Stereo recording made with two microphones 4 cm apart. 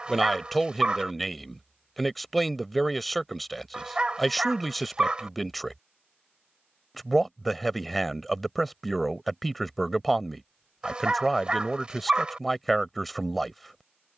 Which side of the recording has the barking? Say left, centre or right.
right.